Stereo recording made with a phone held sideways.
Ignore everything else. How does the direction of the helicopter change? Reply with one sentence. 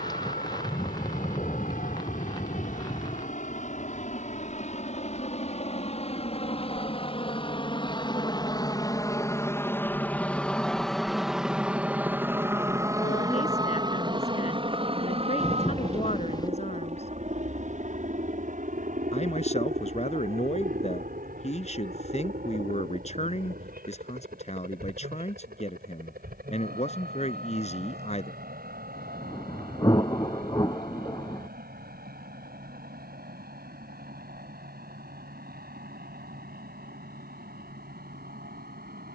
In this clip you hear the helicopter go from the left side to the right.